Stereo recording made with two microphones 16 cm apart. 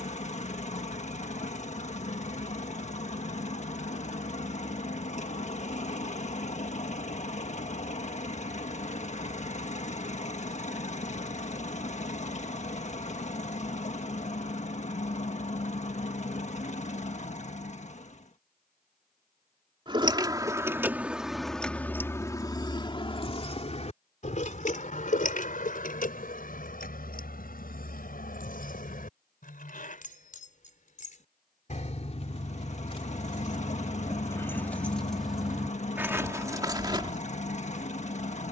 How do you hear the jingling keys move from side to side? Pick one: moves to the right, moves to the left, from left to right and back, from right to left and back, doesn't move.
from right to left and back.